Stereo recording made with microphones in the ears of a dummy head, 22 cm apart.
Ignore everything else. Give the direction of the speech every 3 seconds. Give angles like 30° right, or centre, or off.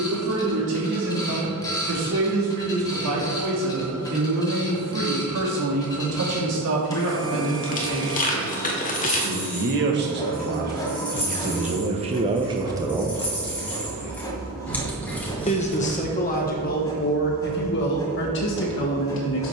80° right, 70° right, 70° right, 40° right, 20° right, 40° left, 50° left.